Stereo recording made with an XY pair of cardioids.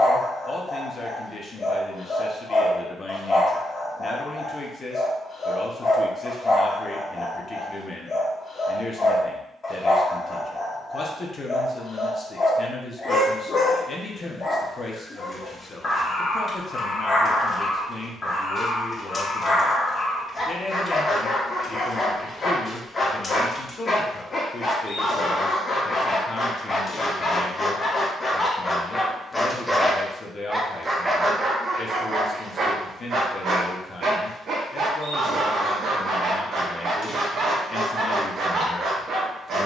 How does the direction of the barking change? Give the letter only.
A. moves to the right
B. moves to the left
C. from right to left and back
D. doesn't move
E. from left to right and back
A.